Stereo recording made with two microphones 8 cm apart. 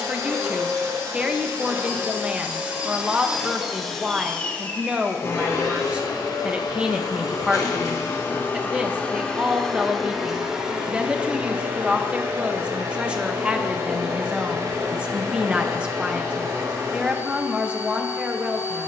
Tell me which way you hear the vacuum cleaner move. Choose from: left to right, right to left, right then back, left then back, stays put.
left then back.